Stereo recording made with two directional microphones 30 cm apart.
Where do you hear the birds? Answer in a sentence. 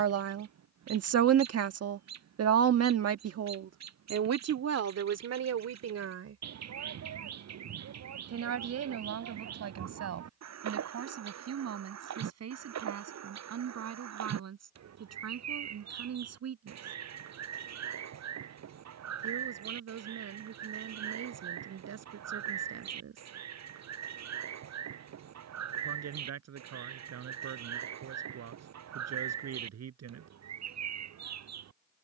You can hear the birds on the right.